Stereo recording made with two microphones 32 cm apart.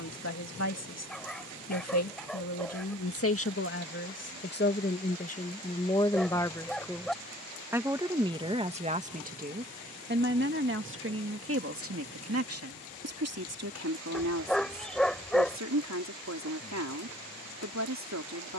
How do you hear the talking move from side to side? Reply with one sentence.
You can hear the talking move to the right.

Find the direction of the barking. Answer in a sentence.
You can hear the barking in the centre.